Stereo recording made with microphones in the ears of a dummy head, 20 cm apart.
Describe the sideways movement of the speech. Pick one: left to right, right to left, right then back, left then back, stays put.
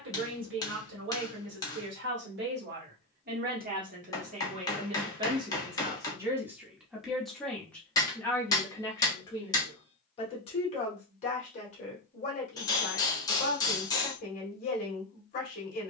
right to left.